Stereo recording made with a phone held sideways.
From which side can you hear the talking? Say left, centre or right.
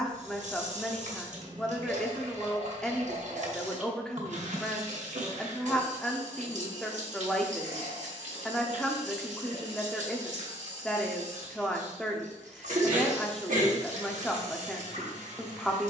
centre.